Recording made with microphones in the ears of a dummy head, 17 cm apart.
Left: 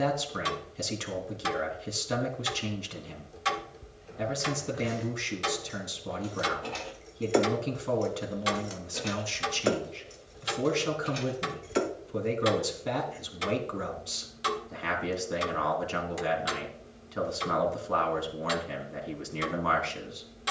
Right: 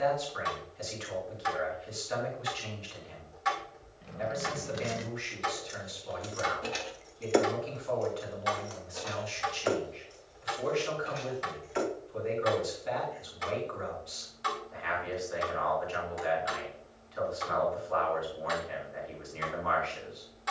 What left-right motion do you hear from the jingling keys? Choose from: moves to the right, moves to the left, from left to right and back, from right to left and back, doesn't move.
moves to the left.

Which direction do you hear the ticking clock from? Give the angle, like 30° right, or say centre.
40° left.